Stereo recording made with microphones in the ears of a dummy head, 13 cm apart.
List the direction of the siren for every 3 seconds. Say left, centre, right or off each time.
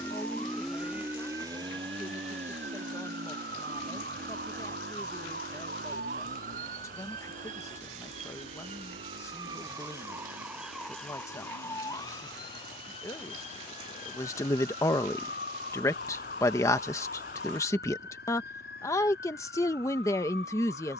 right, right, right, centre, left, left, left.